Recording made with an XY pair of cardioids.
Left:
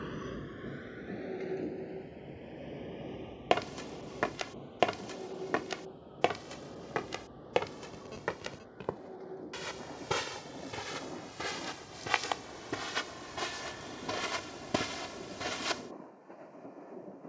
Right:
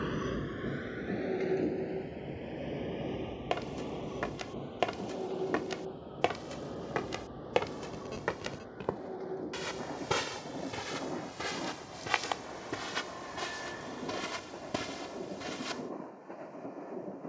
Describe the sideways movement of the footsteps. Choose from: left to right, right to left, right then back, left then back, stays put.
right then back.